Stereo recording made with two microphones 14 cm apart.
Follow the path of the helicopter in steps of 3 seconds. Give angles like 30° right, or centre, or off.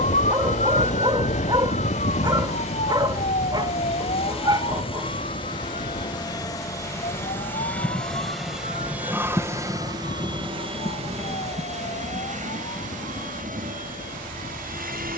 50° left, 40° left, 10° left, 30° right, 60° right.